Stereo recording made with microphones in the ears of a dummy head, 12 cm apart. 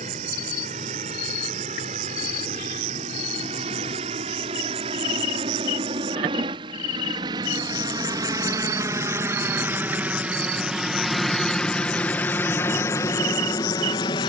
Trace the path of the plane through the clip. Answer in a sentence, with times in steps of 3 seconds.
In this clip you hear the plane on the right from 0 s, in the centre from 9 s and on the left from 12 s.